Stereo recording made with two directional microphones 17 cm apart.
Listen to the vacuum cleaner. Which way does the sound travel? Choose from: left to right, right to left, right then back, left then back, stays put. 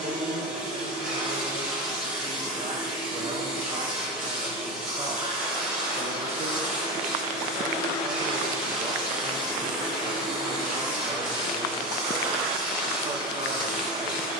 stays put.